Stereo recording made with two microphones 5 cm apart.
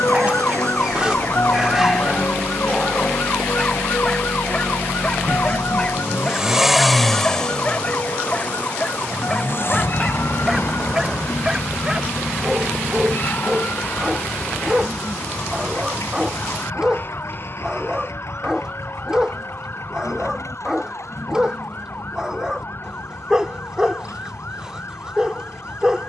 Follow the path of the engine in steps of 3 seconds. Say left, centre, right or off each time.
right, right, centre, left, left, left, left, left, left.